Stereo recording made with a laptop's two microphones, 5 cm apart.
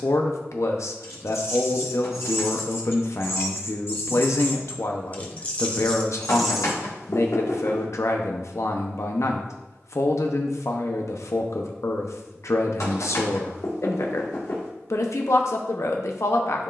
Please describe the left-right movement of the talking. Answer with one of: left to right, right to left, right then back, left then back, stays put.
stays put.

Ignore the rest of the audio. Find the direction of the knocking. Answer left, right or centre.
left.